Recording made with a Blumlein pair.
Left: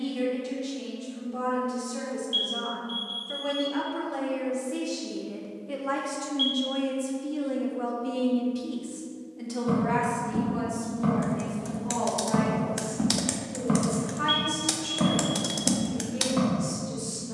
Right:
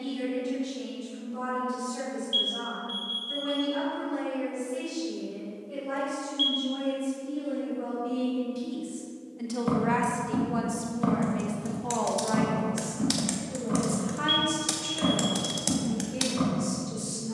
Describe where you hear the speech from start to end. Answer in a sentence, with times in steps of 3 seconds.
You can hear the speech on the left from 0 s and on the right from 9 s.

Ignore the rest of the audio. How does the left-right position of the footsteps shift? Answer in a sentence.
In this clip you hear the footsteps travel towards the left.